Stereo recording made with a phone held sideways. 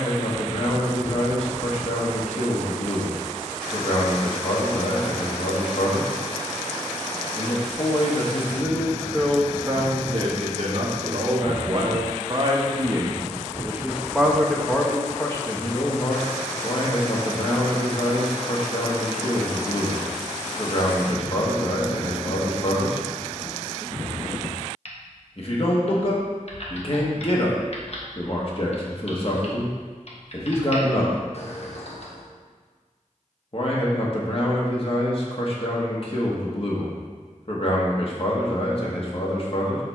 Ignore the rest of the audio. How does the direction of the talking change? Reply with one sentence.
In this clip you hear the talking move from left to right and back again.